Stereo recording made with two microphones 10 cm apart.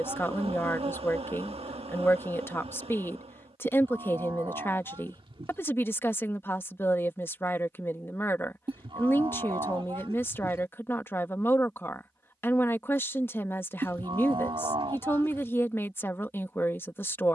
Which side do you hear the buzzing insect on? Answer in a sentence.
You can hear the buzzing insect on the right.